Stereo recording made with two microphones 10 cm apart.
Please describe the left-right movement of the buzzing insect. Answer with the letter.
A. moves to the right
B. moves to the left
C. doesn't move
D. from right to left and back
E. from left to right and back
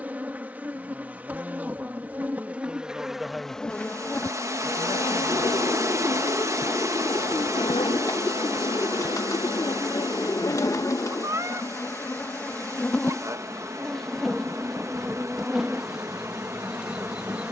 D.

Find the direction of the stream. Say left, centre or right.
right.